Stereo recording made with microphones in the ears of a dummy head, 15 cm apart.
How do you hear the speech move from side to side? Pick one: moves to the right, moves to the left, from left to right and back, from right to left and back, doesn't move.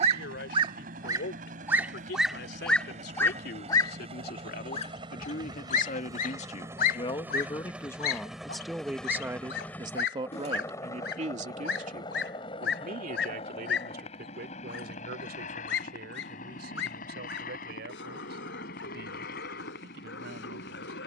moves to the right.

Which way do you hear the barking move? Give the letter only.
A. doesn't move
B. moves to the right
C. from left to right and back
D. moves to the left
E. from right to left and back
D.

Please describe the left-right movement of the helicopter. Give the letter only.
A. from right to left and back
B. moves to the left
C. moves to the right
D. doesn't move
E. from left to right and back
B.